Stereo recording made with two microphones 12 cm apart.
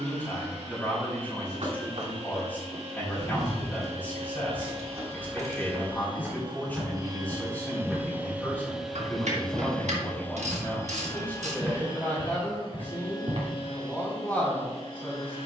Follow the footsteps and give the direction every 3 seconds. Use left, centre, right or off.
right, right, centre, centre, right.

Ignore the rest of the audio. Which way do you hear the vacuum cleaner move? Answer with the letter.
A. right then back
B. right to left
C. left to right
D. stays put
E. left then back
B.